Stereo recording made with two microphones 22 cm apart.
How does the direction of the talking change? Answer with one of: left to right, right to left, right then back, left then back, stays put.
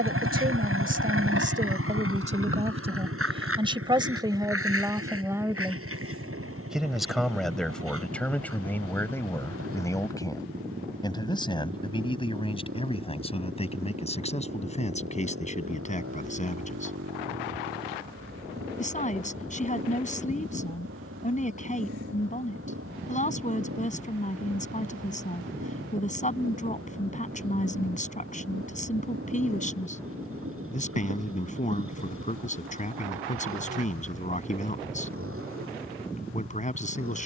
right to left.